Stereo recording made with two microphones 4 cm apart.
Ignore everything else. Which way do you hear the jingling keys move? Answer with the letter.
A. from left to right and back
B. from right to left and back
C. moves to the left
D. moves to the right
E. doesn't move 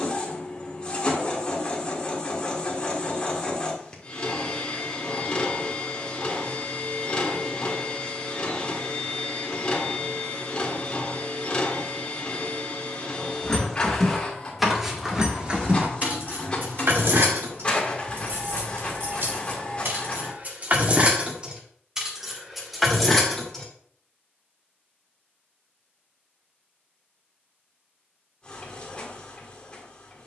A.